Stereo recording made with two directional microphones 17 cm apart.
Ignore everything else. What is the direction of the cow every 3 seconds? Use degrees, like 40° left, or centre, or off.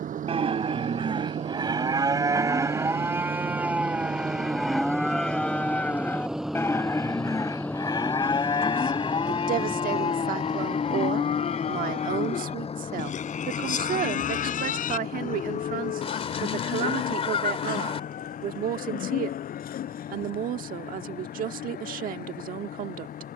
30° right, centre, 20° left, 40° left, 50° left, 60° left, 60° left, 70° left.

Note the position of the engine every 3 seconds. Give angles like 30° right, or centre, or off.
40° right, 20° right, 10° left, 30° left, 40° left, 50° left, 50° left, 60° left.